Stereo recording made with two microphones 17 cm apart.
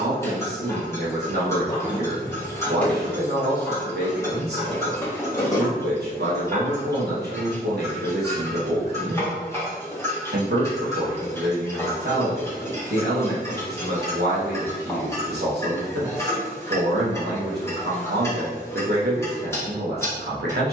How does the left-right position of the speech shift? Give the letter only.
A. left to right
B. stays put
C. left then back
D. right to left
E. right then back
B.